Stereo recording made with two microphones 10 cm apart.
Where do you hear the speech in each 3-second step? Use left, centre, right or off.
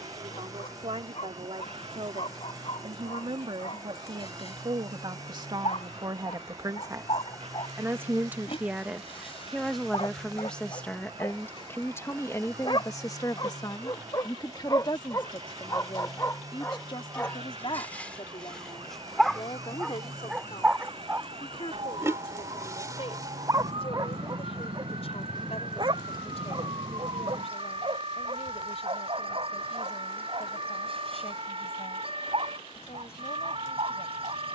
right, right, right, centre, left, left, left, left, left, left, left, left.